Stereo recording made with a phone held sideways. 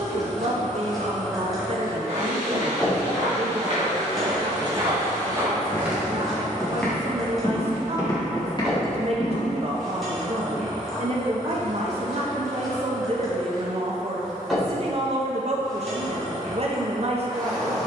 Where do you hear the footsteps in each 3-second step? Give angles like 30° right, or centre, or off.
50° right, 30° right, 20° left, 40° left, off, off.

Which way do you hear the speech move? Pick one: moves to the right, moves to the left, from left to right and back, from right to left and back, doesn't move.
doesn't move.